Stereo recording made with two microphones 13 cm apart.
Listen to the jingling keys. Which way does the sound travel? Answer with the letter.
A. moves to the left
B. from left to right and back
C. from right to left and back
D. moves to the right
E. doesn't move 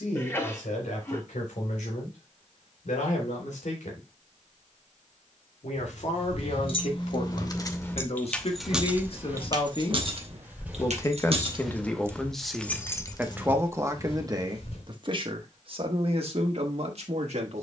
B.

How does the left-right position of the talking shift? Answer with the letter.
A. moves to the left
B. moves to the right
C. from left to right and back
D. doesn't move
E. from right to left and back
B.